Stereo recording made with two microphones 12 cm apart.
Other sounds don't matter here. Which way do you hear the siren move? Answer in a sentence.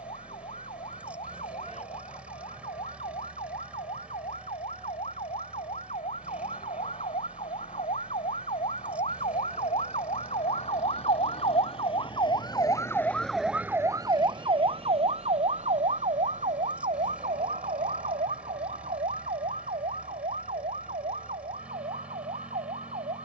You can hear the siren move from left to right.